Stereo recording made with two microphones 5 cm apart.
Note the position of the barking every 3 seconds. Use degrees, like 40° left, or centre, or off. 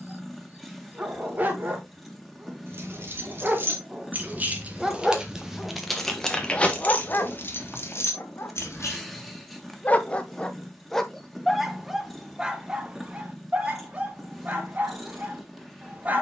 30° right, 10° right, 40° left, 20° left, 20° right, 30° right.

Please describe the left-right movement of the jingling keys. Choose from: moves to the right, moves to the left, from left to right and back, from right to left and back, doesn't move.
moves to the left.